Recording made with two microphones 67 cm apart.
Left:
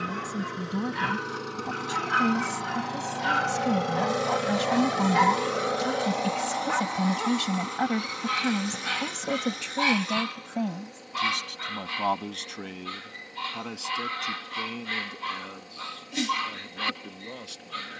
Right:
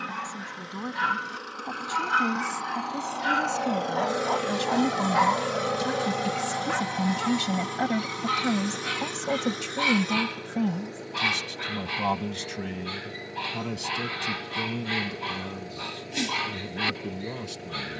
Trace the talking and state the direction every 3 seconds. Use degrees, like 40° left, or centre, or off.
50° left, 30° left, centre, 40° right, 60° right, 70° right.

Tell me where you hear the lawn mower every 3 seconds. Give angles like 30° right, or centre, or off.
70° left, 10° left, 60° right, 80° right, 80° right, 80° right.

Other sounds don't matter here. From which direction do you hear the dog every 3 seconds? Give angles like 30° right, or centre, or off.
10° right, 40° left, 50° left, 20° right, 30° right, 30° right.